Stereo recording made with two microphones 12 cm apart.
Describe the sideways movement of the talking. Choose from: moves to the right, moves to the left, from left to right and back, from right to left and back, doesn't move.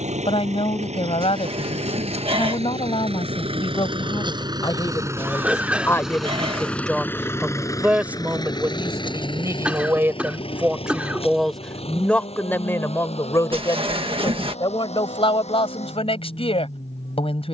from left to right and back.